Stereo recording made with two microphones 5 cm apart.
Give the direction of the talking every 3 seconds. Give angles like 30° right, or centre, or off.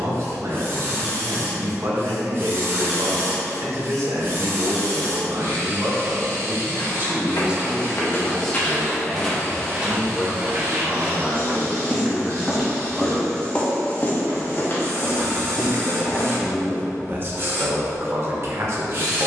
60° right, 60° right, 20° right, 20° left, 10° left, 30° right, 50° right.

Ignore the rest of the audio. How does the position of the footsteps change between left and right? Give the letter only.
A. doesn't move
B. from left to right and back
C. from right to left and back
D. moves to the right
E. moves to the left
B.